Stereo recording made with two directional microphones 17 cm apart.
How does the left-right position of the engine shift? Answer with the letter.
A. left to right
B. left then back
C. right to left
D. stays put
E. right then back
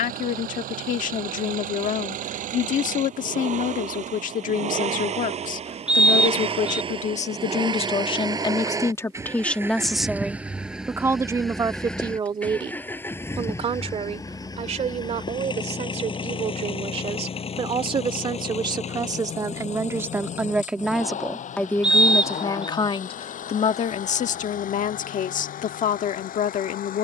C.